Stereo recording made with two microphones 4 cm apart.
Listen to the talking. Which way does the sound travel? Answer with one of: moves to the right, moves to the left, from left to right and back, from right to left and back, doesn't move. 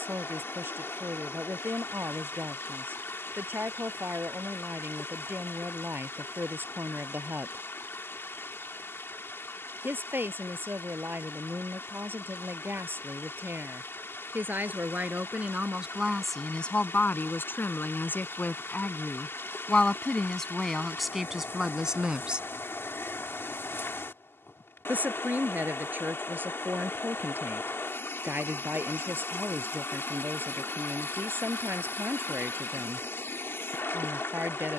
from right to left and back.